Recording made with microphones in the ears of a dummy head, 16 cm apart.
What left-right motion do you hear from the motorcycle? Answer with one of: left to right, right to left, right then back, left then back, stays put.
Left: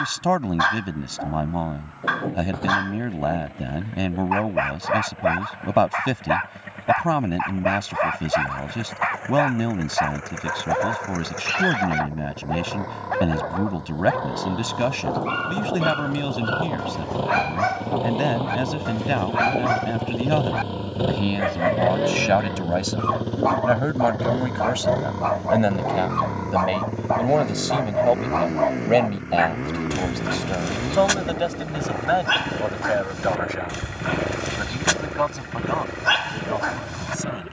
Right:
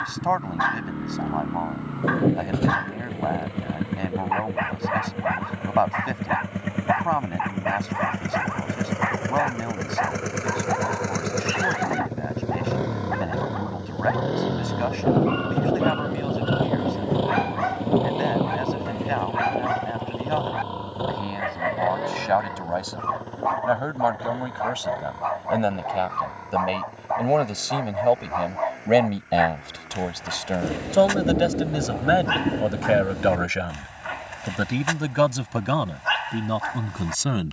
right to left.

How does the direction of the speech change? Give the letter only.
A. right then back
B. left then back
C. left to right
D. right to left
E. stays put
C.